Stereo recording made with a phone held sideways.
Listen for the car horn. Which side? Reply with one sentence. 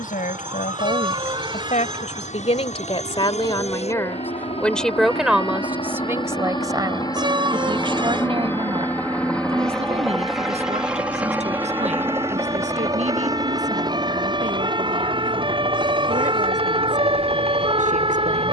In this clip you hear the car horn on the right.